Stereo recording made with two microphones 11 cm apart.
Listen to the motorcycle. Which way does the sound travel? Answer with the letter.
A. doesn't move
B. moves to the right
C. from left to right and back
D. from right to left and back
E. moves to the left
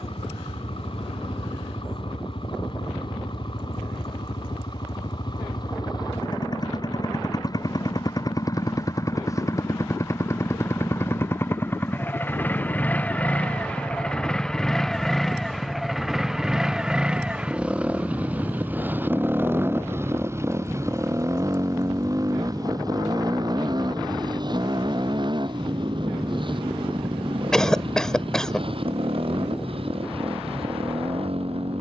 B.